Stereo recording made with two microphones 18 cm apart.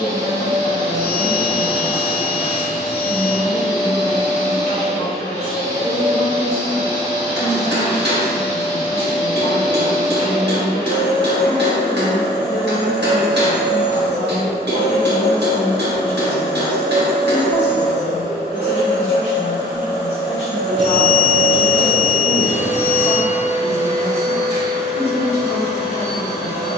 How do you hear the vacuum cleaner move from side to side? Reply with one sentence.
You can hear the vacuum cleaner stay put.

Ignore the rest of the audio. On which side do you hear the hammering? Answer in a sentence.
In this clip you hear the hammering on the right.